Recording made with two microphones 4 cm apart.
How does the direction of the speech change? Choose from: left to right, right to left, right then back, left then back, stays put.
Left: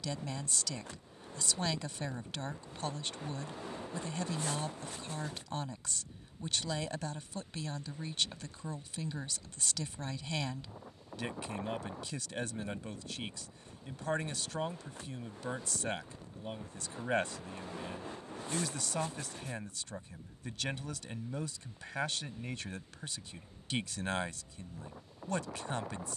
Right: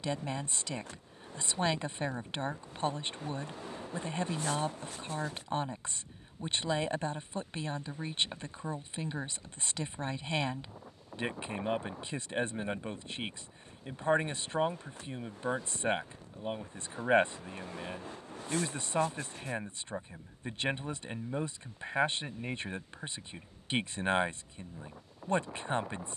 stays put.